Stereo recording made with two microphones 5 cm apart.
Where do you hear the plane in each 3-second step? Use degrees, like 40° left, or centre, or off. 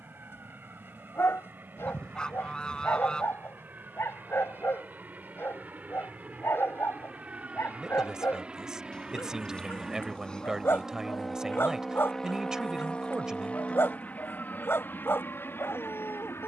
50° right, 40° right, 30° right, 10° right, 30° left, 50° left.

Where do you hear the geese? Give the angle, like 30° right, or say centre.
20° left.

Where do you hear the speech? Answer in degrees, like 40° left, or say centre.
20° right.